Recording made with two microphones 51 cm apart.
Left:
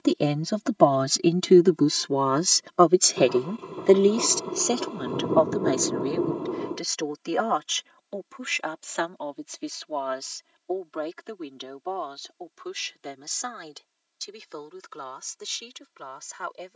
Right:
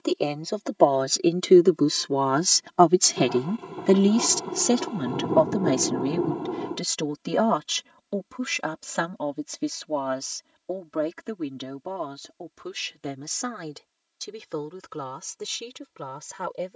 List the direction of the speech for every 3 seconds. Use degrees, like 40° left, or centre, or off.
10° left, 40° right, 60° right, 60° right, 70° right, 70° right.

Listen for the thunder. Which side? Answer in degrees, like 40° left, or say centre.
10° right.